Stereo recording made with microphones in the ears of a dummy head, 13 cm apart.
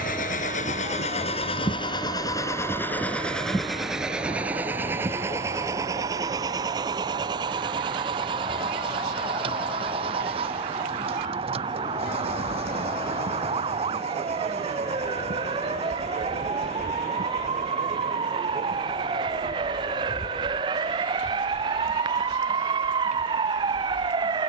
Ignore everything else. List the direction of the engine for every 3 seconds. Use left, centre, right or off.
left, centre, right, right, right, right, right, right.